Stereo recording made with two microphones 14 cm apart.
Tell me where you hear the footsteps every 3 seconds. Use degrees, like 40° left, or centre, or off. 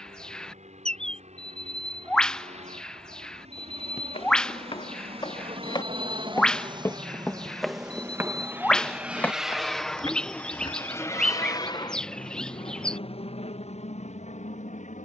off, 40° left, centre, 30° left, off.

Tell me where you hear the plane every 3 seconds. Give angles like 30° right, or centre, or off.
60° right, 50° right, 30° right, 10° left, 40° left.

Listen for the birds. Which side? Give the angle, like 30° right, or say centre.
10° left.